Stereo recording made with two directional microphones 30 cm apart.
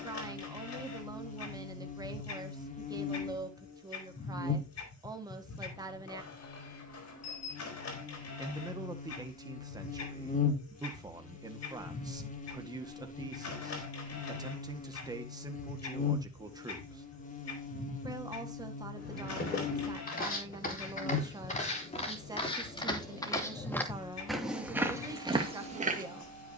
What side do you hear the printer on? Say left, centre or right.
left.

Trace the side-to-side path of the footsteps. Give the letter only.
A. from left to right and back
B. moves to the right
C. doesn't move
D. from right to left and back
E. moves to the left
B.